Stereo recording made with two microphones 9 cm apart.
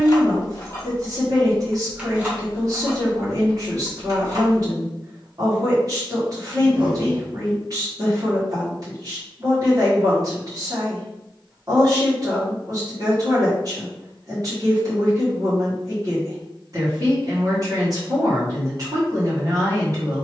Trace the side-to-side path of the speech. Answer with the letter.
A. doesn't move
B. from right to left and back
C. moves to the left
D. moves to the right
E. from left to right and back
A.